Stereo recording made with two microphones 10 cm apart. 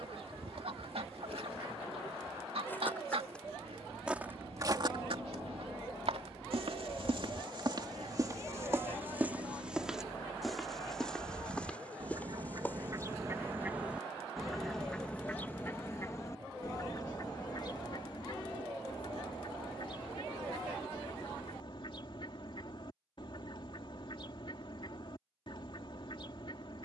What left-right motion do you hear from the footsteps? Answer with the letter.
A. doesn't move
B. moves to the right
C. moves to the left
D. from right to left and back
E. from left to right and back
E.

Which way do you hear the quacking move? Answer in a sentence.
You can hear the quacking move to the left.